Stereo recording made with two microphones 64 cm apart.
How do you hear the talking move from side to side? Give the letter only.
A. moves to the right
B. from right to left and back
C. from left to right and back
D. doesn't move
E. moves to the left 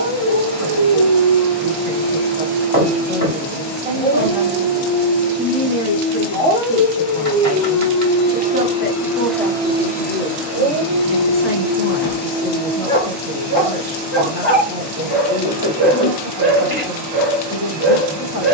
B.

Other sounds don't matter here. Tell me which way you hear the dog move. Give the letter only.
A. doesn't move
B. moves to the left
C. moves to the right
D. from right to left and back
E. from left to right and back
C.